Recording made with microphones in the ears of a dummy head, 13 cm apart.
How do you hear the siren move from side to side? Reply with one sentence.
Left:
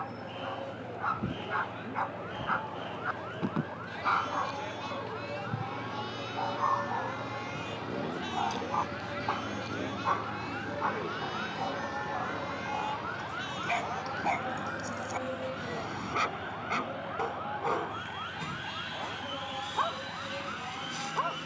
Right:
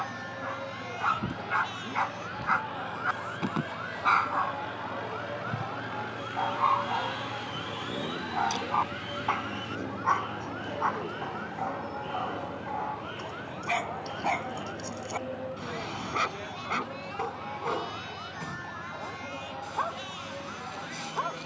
You can hear the siren travel towards the left.